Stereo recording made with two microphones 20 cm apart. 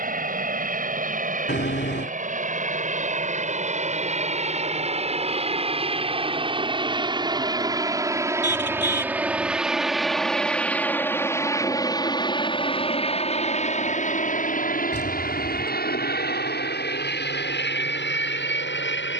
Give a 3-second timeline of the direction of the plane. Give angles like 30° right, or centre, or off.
50° right, 40° right, 20° right, 10° left, 30° left, 50° left, 60° left.